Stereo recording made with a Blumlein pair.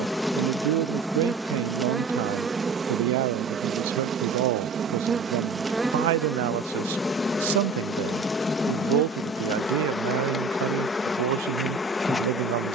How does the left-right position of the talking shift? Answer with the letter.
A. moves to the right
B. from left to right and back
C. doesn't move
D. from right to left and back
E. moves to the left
C.